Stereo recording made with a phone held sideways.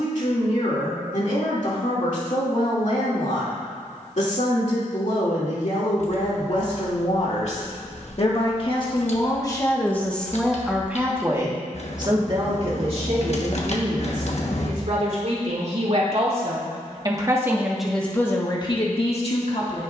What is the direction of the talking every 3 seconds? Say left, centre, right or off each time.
left, left, left, centre, right, right, left.